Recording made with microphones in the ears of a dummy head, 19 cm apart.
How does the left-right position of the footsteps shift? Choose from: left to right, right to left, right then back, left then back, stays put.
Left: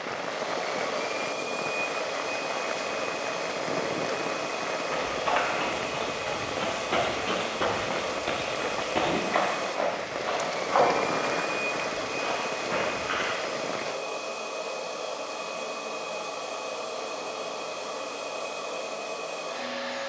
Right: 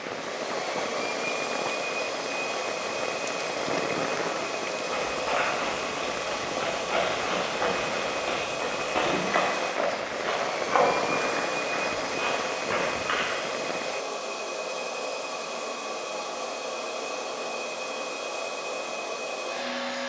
left to right.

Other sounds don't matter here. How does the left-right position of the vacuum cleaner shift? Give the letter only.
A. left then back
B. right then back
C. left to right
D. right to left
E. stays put
E.